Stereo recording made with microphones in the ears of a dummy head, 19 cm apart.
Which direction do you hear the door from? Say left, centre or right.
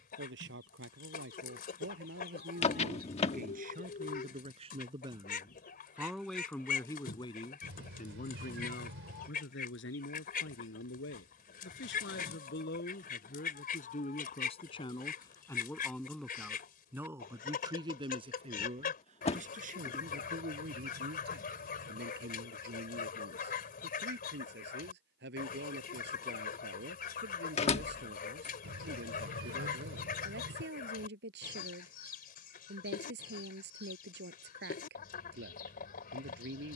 left.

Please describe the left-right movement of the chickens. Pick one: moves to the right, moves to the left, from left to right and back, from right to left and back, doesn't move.
doesn't move.